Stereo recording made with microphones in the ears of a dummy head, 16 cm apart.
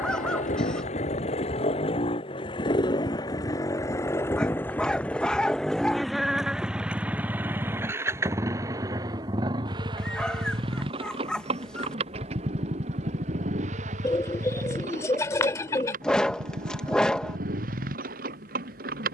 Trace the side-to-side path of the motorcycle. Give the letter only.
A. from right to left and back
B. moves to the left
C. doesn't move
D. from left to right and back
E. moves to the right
E.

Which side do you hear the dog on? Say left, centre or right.
centre.